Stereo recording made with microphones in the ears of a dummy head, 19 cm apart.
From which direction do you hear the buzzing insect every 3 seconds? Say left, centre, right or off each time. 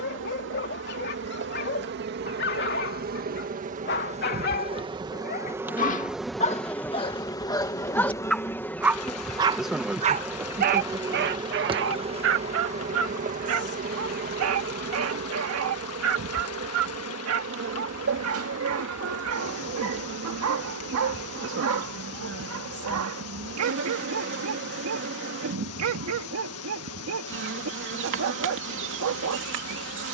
right, right, centre, centre, right, right, right, right, right, right.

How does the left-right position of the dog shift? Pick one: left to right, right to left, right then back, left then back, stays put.
left to right.